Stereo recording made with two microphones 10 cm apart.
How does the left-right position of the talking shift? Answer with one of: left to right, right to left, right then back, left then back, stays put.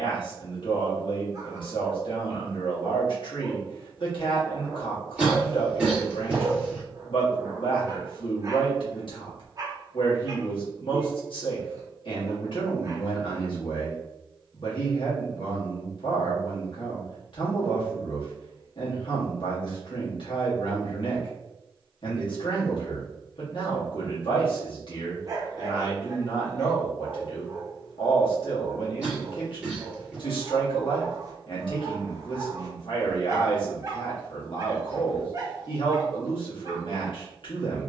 stays put.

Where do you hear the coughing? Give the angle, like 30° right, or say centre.
10° right.